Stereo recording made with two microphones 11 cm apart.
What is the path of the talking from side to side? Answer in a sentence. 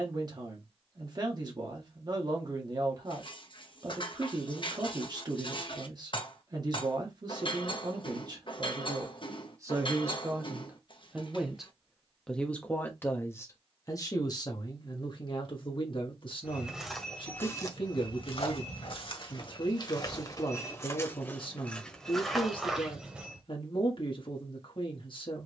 In this clip you hear the talking go from the right side to the left.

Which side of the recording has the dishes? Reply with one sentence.
You can hear the dishes on the left.